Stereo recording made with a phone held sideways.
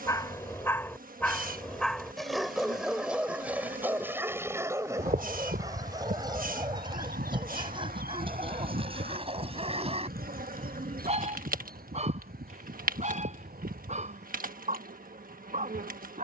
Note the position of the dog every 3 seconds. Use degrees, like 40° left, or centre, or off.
10° left, 20° right, 30° right, 40° right, 50° right, 50° right.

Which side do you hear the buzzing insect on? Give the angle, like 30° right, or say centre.
70° right.